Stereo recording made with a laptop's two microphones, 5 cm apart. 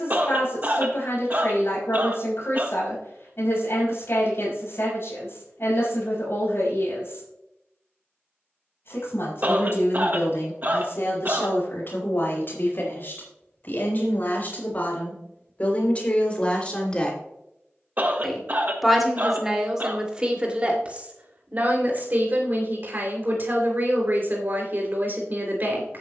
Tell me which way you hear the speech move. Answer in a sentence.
In this clip you hear the speech travel towards the right.